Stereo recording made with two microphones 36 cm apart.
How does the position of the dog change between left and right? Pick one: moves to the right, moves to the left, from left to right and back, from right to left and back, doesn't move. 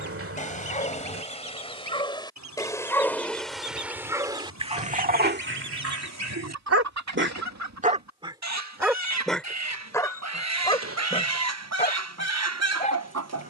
from left to right and back.